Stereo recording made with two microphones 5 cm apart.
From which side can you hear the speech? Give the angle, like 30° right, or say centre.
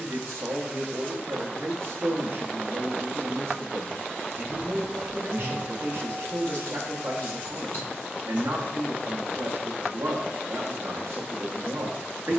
70° right.